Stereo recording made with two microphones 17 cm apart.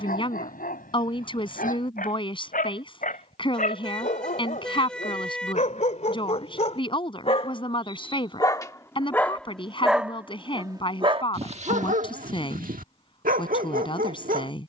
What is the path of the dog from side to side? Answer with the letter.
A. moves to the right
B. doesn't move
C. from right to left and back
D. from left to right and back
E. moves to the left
A.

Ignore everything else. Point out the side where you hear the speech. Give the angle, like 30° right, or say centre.
30° left.